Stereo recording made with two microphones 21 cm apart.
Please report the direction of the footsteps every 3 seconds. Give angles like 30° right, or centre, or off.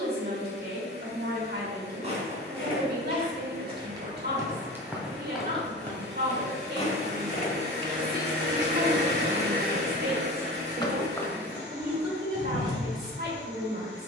30° right, 10° right, 30° left, 30° left, 20° right.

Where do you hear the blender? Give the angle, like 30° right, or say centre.
60° right.